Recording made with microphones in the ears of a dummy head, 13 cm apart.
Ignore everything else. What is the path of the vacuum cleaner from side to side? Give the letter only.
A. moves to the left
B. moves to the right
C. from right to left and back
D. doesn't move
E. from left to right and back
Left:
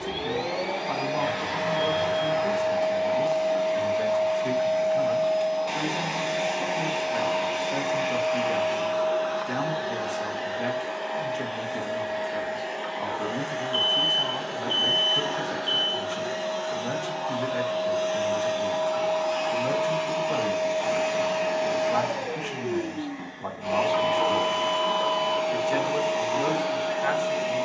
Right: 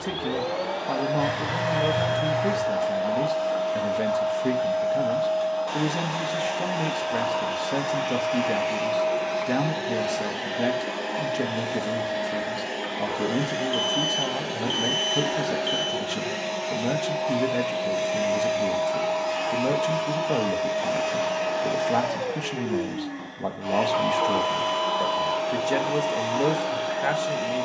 E.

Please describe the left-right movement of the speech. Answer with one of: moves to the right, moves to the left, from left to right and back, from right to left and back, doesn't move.
doesn't move.